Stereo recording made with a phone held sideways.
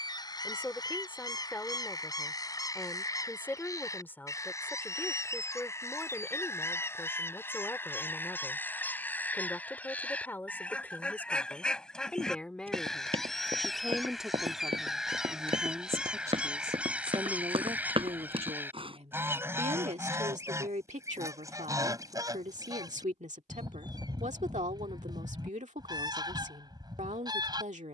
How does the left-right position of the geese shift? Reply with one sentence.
In this clip you hear the geese go from the left side to the right.